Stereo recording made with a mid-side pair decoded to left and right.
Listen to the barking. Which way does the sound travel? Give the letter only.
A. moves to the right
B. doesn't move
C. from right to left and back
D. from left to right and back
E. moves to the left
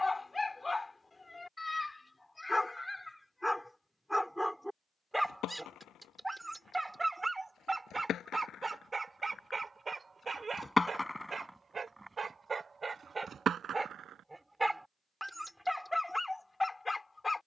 D.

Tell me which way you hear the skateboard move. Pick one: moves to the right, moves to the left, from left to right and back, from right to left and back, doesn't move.
moves to the right.